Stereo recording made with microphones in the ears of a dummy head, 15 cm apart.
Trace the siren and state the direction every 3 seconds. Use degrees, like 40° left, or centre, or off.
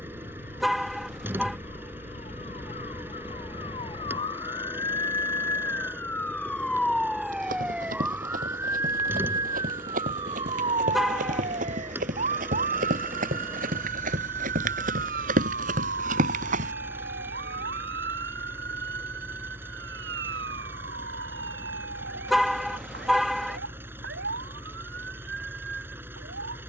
50° left, 30° left, centre, 30° right, 50° right, 60° right, 70° right, 70° right, 70° right.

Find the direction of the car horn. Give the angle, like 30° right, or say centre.
centre.